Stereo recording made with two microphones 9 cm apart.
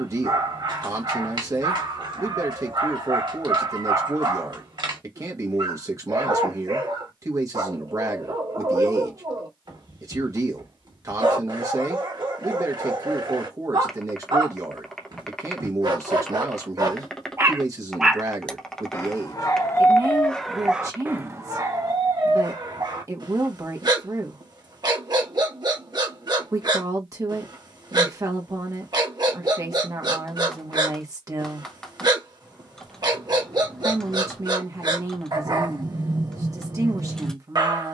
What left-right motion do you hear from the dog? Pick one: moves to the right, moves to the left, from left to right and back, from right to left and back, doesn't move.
from right to left and back.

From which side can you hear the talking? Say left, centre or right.
right.